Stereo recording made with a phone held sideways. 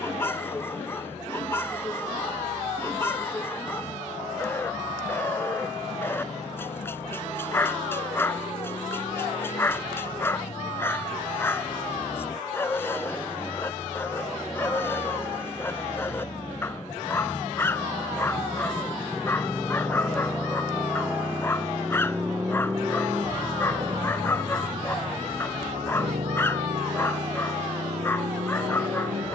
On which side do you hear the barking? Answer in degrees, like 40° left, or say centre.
20° left.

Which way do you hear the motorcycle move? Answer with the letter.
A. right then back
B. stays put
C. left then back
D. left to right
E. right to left
D.